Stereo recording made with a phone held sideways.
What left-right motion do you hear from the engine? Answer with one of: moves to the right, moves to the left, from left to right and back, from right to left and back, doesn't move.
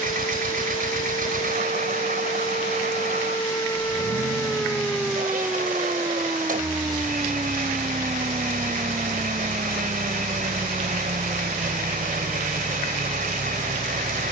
doesn't move.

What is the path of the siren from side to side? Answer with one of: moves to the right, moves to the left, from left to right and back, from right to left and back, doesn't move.
moves to the right.